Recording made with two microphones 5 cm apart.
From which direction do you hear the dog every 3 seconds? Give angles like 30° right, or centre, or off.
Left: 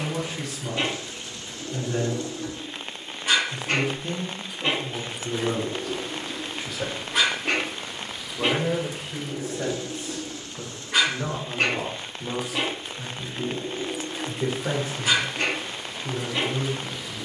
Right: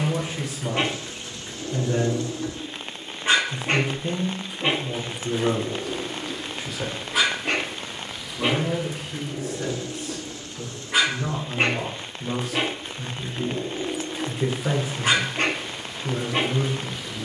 50° right, 20° right, centre, centre, 40° right, 50° right.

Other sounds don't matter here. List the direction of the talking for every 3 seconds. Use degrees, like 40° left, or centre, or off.
30° right, 20° right, 10° left, 30° left, 10° left, 20° right.